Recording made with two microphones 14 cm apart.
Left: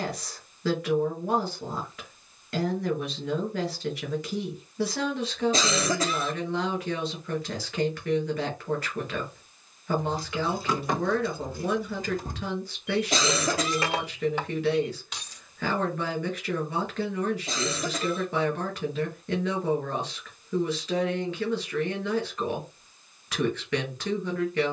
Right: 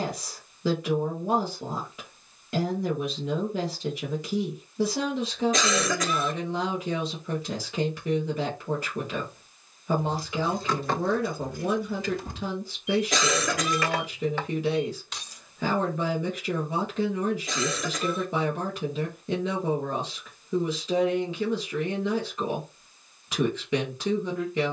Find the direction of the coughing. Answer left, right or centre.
left.